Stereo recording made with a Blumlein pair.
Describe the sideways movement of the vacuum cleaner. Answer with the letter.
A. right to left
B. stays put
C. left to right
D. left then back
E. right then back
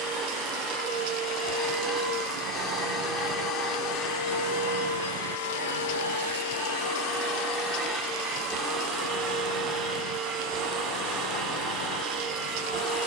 D.